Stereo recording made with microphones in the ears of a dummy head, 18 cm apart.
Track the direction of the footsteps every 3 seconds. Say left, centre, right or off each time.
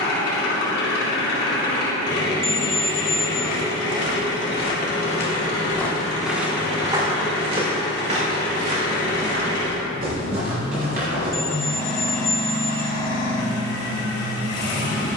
off, left, right, right, off.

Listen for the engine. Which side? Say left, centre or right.
left.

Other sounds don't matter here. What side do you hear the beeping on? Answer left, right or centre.
centre.